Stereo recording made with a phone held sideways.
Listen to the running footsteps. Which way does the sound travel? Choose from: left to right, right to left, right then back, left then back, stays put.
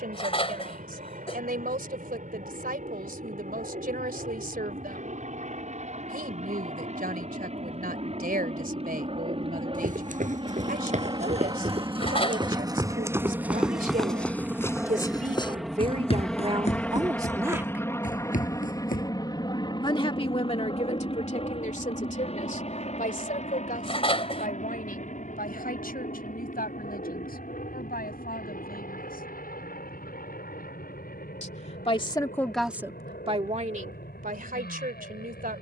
right to left.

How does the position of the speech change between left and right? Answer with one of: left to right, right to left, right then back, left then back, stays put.
left then back.